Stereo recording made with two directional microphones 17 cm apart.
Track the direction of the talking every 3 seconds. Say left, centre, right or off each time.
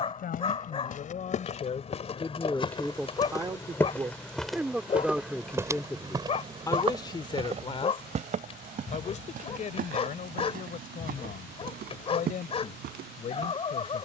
left, centre, left, left, left.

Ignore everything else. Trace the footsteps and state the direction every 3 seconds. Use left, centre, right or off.
left, centre, right, right, right.